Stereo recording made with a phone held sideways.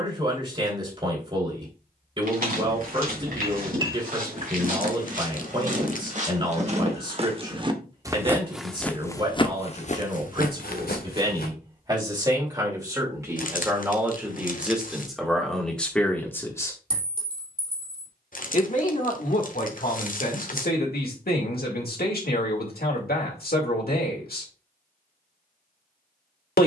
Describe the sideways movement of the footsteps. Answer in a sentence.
In this clip you hear the footsteps move from right to left.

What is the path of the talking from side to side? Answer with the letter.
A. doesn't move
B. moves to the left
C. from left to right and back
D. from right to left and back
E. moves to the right
B.